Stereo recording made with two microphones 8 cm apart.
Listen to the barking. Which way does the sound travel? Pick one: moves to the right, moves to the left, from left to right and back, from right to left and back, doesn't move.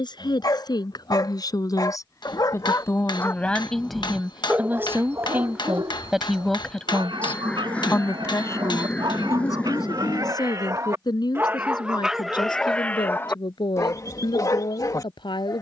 from left to right and back.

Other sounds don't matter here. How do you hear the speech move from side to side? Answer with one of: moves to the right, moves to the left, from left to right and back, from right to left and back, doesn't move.
from left to right and back.